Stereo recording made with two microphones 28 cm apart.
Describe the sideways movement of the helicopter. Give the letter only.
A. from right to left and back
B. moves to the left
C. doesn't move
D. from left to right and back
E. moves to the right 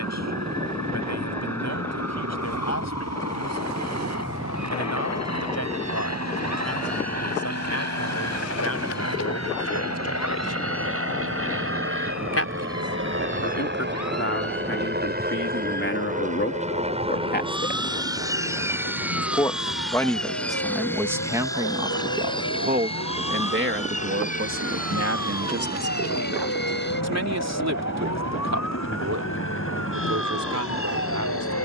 B.